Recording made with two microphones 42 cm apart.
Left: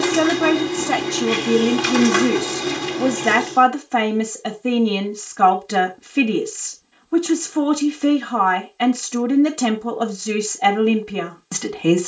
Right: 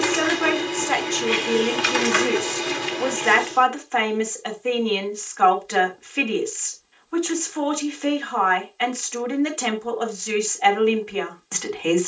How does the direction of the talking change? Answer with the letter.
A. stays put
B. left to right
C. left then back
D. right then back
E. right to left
A.